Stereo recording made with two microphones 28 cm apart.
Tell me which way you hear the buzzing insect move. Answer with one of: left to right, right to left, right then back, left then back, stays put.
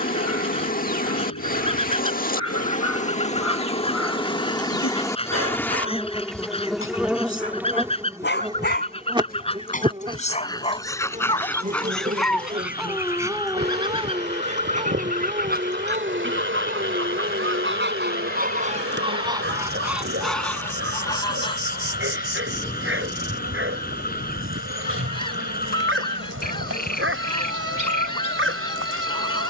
left to right.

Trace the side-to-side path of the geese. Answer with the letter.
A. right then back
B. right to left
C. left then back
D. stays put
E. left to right
A.